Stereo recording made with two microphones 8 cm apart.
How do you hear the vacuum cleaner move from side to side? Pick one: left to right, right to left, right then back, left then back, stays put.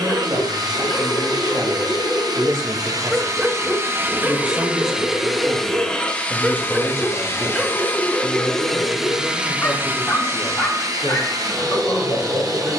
left then back.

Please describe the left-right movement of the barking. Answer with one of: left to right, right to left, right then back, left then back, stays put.
right then back.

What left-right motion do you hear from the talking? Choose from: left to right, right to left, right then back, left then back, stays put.
right to left.